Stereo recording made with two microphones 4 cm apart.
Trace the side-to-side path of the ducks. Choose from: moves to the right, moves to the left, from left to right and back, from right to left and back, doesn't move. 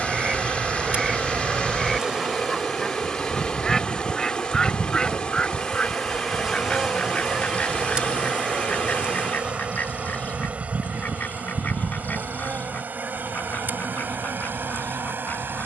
moves to the left.